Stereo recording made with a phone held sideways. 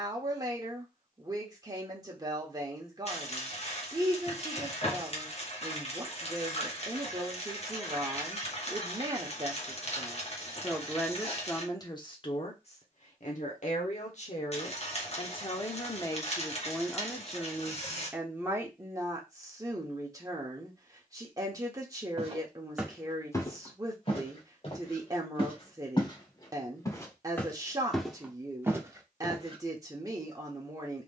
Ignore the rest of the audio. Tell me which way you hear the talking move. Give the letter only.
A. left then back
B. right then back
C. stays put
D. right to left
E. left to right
A.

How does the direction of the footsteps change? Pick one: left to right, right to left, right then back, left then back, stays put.
left then back.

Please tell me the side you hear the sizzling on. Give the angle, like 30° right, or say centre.
50° left.